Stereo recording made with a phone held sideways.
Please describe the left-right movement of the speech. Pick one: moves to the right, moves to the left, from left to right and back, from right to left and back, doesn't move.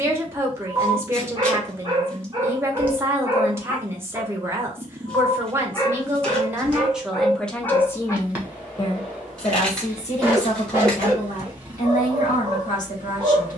moves to the left.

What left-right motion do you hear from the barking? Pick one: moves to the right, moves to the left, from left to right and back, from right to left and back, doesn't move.
from right to left and back.